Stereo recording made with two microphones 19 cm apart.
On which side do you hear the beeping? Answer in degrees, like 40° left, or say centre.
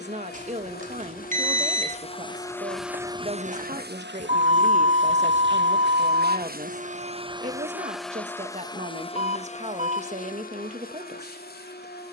40° right.